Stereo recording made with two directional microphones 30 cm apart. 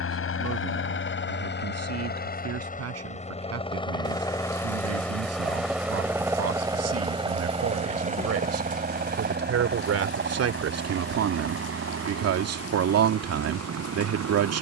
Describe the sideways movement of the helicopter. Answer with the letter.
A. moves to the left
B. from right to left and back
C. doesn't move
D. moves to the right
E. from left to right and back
D.